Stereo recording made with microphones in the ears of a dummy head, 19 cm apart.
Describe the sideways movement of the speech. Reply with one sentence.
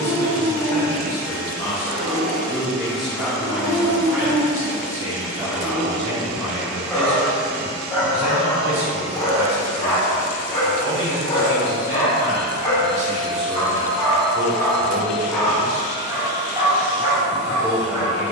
In this clip you hear the speech move from left to right and back again.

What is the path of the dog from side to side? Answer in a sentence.
In this clip you hear the dog move from right to left and back again.